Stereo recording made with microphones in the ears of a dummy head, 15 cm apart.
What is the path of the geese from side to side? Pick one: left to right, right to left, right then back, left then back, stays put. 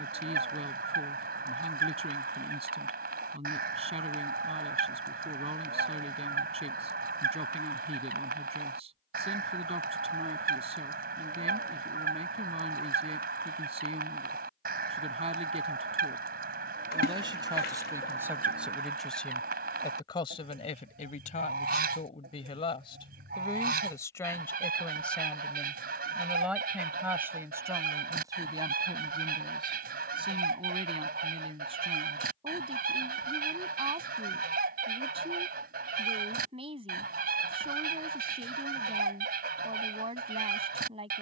stays put.